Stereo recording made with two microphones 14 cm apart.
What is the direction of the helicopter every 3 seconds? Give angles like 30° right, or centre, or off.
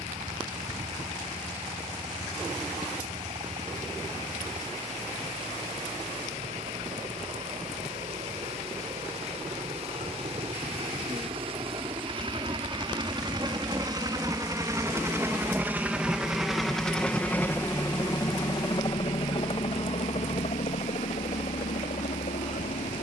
60° right, 60° right, 50° right, 50° right, 30° right, centre, 40° left, 60° left.